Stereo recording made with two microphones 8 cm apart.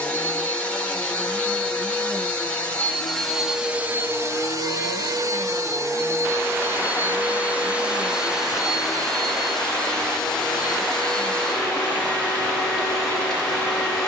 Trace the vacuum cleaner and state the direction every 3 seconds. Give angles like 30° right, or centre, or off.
20° left, 30° right, 20° right, 10° left, 10° left.